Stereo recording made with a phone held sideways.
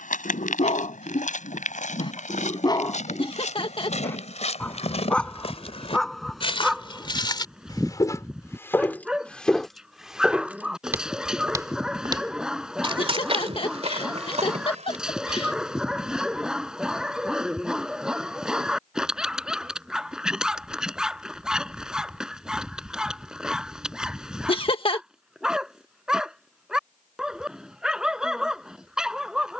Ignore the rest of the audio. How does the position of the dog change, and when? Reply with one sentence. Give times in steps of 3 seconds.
In this clip you hear the dog on the left from 0 s and in the centre from 3 s.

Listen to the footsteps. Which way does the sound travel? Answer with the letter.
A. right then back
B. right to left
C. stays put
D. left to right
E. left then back
D.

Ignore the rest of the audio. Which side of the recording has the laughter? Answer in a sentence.
In this clip you hear the laughter on the left.